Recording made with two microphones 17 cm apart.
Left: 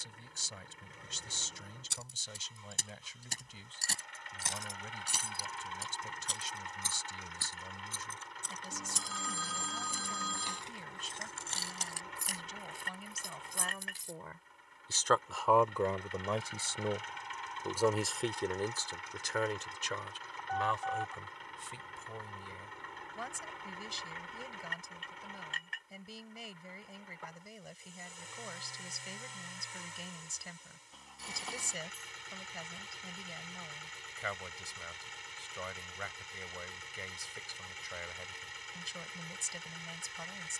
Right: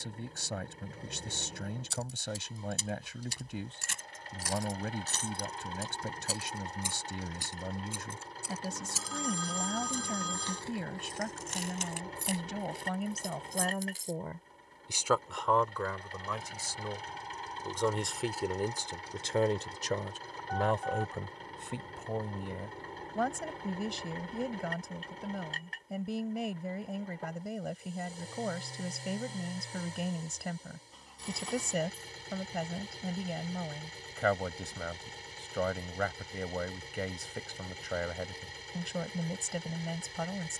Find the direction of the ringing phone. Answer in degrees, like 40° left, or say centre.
centre.